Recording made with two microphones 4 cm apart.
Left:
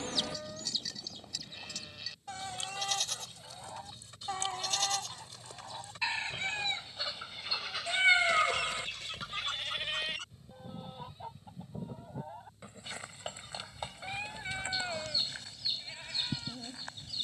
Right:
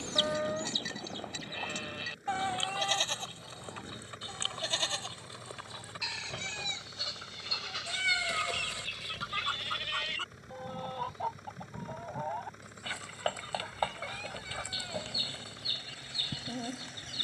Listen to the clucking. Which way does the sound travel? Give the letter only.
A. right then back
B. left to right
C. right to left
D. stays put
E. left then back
E.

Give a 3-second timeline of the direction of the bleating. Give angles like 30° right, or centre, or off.
40° right, 40° right, 10° right, 10° left, 30° left, 30° left.